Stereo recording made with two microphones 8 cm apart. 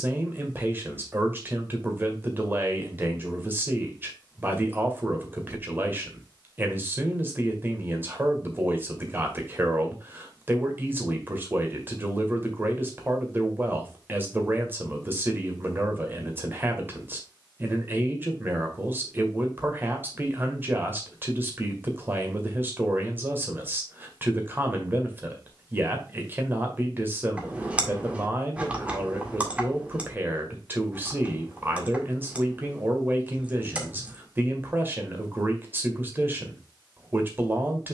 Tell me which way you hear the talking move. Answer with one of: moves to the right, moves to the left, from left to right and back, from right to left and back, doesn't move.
doesn't move.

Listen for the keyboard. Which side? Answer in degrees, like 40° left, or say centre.
20° right.